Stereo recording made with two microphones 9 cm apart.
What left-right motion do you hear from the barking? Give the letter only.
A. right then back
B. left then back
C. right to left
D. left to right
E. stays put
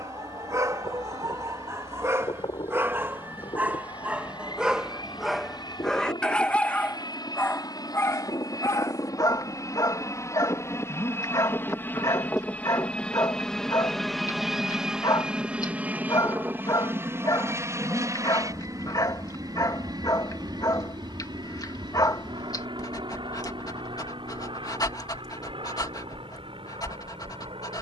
C.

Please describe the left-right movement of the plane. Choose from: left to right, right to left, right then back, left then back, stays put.
left to right.